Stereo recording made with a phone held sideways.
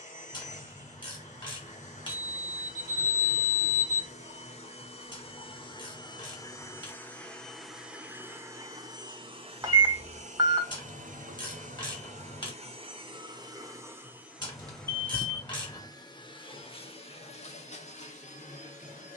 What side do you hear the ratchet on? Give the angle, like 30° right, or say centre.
30° left.